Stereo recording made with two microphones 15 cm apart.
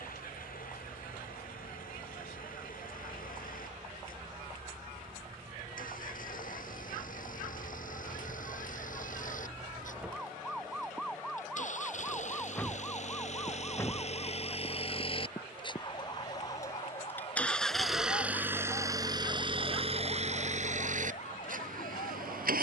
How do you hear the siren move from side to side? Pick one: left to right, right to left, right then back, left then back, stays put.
right to left.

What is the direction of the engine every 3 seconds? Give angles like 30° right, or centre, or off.
70° left, 70° left, 60° left, 60° left, 50° left, 20° left, 30° right, 60° right.